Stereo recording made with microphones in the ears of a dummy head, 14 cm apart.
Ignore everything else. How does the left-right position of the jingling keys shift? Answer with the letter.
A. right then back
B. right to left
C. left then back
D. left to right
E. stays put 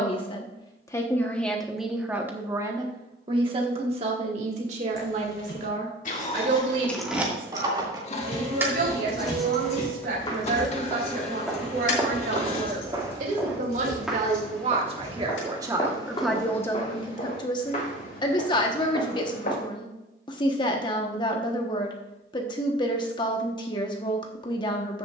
A.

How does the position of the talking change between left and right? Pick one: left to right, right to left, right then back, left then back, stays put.
right then back.